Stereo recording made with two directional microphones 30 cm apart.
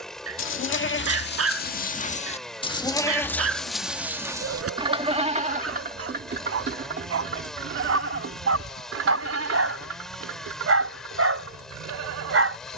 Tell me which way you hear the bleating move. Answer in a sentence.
You can hear the bleating move from left to right.